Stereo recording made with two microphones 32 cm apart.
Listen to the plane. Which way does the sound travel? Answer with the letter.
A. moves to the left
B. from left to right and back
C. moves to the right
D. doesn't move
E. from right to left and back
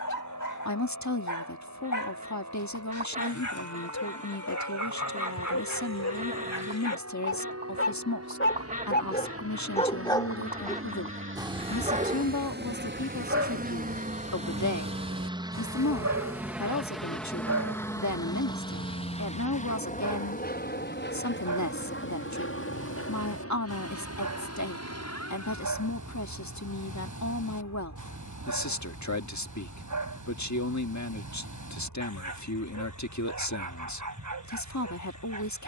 A.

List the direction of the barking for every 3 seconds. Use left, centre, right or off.
left, left, left, centre, right, right, right, right, right, right, right, right.